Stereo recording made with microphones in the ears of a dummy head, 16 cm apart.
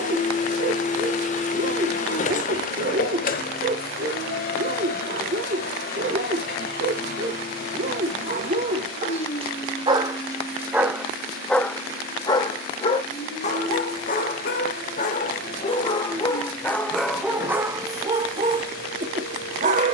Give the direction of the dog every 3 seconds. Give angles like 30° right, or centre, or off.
50° right, 50° right, 50° right, 10° right, 40° left, 10° left, 40° right.